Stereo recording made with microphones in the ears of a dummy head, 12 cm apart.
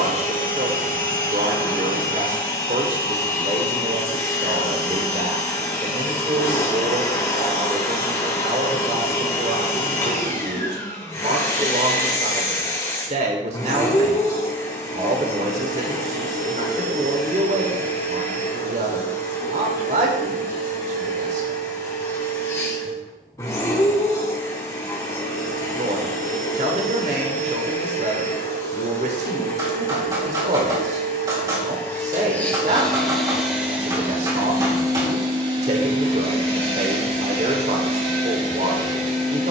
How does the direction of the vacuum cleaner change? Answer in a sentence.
In this clip you hear the vacuum cleaner move from left to right.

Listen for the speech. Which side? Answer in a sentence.
You can hear the speech on the right.